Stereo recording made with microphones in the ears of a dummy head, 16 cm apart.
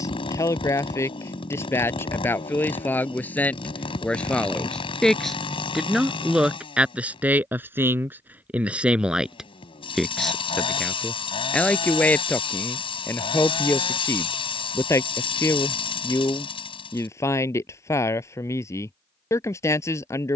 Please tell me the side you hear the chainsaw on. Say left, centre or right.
left.